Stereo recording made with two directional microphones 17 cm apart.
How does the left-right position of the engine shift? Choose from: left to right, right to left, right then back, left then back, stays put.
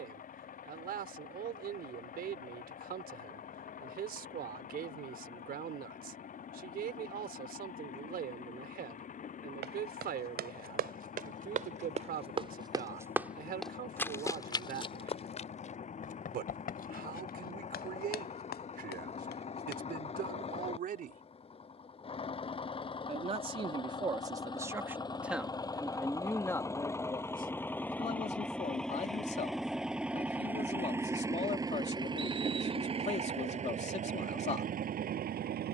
left to right.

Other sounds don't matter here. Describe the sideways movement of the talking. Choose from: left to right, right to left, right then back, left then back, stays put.
right to left.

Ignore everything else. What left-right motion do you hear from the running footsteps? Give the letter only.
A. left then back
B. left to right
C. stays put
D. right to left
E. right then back
D.